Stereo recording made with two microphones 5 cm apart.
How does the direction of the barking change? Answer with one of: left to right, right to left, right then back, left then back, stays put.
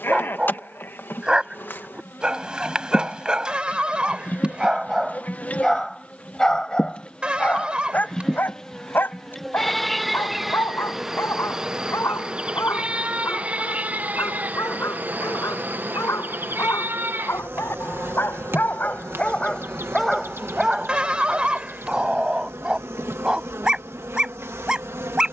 left then back.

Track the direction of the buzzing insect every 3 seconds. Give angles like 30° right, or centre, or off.
50° left, 40° left, 20° left, centre, 30° right, 50° right, 60° right, 70° right, 70° right.